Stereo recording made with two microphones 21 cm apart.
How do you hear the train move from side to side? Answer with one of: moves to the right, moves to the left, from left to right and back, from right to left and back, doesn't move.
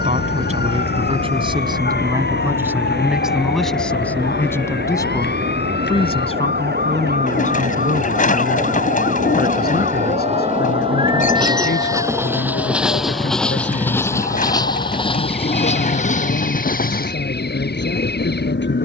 moves to the left.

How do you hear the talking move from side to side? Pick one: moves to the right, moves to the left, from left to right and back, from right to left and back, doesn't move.
moves to the left.